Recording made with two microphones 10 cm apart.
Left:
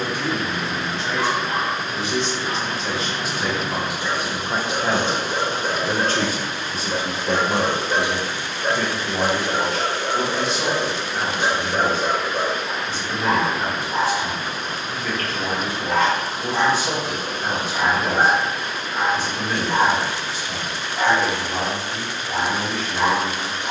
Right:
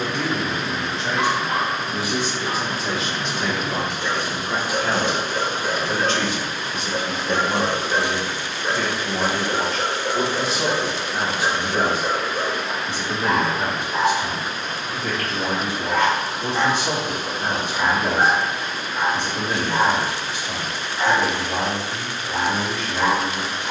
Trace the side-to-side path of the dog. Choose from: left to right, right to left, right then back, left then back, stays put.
right to left.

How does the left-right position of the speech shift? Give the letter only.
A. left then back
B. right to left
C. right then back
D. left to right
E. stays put
A.